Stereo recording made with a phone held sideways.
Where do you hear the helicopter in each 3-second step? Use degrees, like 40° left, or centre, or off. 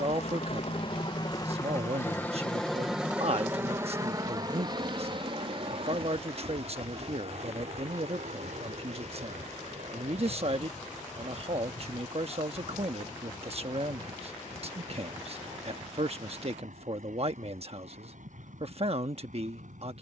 30° left, 30° right, 50° right, 60° right, 60° right, 70° right, 70° right.